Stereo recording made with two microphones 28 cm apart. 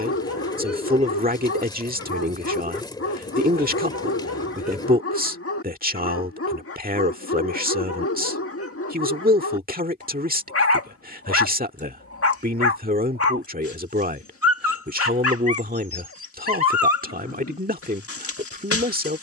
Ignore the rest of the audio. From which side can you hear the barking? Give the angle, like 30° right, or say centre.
50° left.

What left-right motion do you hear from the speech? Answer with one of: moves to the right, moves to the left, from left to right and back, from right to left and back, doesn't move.
doesn't move.